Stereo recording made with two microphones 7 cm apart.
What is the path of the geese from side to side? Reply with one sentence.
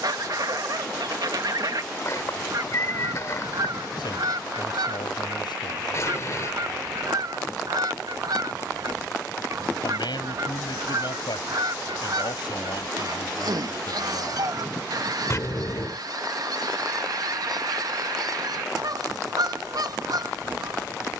You can hear the geese stay put.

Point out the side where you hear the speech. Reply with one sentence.
In this clip you hear the speech on the left.